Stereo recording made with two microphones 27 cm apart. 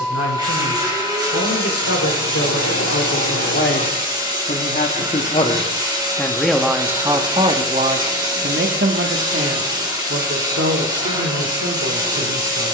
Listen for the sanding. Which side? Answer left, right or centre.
right.